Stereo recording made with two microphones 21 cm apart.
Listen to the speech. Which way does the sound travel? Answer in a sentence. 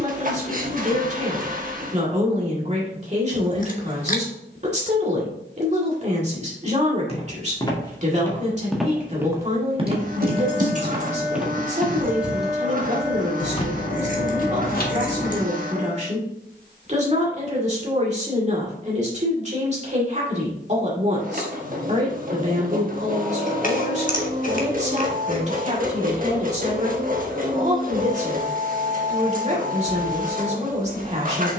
In this clip you hear the speech stay put.